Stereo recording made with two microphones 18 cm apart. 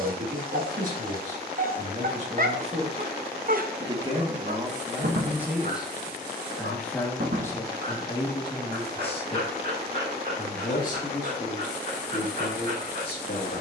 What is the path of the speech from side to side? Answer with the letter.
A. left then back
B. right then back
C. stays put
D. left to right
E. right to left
E.